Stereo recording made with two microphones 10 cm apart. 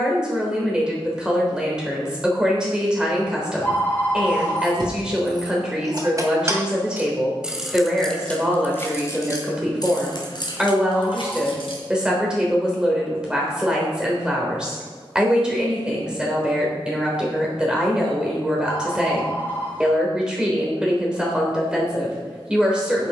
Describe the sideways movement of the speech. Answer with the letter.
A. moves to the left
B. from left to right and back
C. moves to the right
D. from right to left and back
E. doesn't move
E.